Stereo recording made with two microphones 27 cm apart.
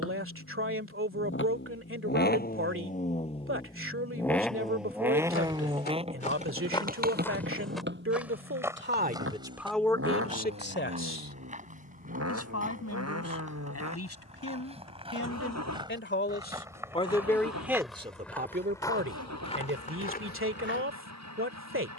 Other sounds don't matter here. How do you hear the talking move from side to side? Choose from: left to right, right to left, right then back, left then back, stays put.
left then back.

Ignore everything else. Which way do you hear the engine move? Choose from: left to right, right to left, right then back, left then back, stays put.
left to right.